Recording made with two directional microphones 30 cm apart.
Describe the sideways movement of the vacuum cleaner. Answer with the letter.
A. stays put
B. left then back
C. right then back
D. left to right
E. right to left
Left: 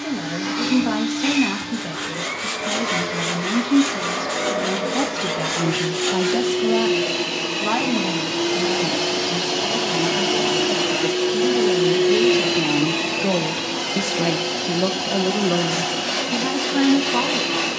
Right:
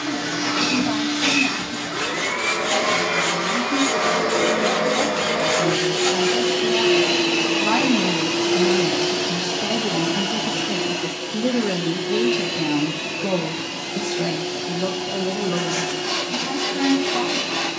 E.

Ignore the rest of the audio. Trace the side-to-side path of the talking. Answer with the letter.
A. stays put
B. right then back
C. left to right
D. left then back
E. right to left
B.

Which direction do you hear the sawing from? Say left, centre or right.
centre.